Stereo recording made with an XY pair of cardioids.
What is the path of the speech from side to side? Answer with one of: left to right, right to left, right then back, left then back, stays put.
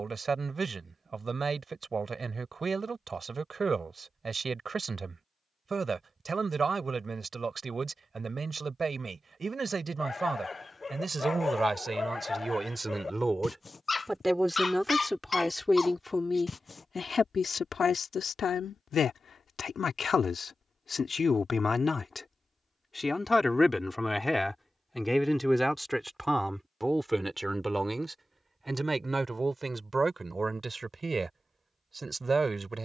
left then back.